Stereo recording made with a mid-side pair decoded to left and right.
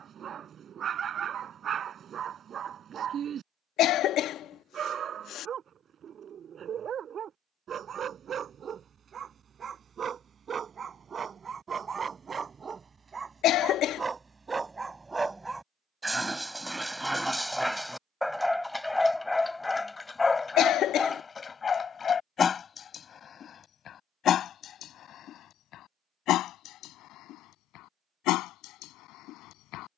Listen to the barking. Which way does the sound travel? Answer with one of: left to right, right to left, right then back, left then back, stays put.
right to left.